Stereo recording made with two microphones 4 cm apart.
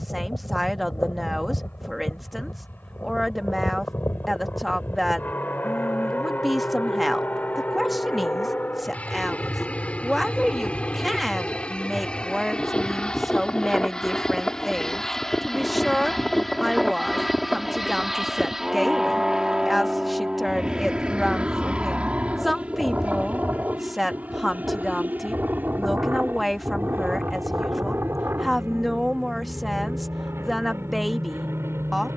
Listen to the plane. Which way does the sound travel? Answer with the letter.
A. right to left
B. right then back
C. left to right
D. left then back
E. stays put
C.